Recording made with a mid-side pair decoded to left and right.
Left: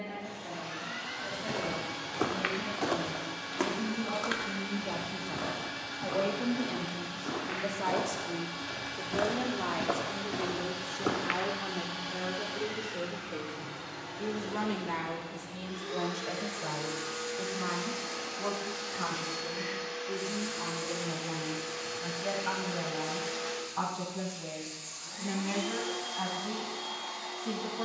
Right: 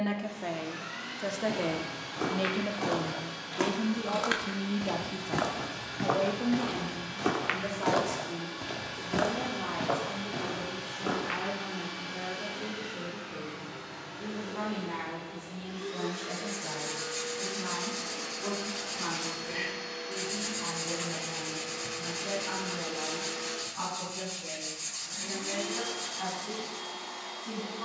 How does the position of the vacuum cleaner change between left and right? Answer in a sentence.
In this clip you hear the vacuum cleaner stay put.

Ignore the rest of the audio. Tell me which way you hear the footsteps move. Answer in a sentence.
You can hear the footsteps go right and come back.